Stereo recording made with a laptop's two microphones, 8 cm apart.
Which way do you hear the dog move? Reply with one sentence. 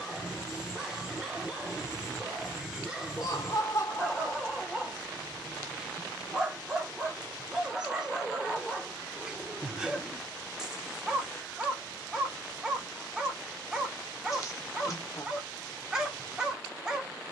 In this clip you hear the dog stay put.